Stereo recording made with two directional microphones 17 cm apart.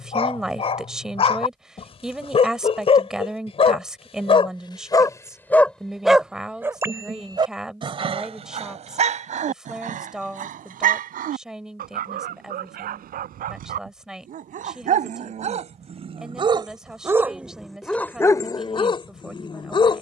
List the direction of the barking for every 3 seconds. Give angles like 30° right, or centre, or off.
30° left, 30° left, 30° right, 50° right, 60° right, 30° right, 30° left.